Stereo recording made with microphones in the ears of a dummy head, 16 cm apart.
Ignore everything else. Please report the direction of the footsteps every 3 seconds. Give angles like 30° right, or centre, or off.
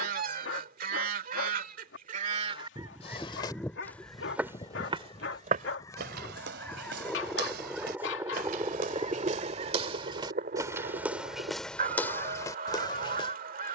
off, 10° right, 60° right, 20° right, 20° left.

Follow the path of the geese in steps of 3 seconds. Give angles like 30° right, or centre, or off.
40° right, 20° left, centre, 40° right, 50° right.